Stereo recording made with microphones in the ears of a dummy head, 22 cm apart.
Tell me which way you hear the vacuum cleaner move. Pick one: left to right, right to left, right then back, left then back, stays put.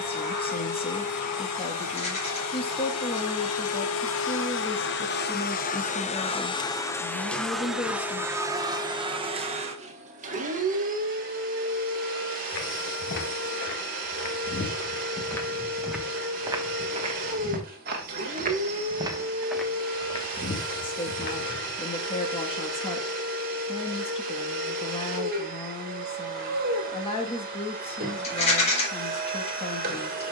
left to right.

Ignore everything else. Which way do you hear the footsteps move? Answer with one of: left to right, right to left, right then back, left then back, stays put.
right then back.